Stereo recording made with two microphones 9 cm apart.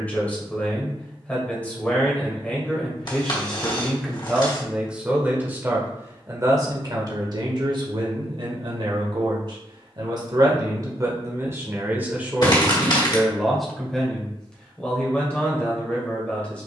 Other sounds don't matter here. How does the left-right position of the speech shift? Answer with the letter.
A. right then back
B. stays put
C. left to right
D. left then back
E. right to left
A.